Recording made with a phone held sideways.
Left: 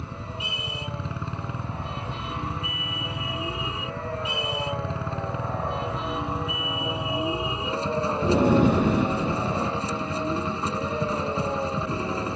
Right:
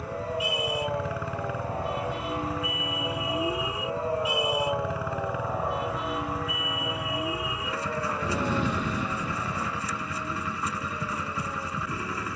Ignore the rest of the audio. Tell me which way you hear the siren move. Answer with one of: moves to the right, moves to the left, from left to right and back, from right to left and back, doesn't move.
moves to the left.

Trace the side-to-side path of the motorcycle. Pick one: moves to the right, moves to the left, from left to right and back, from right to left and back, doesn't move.
doesn't move.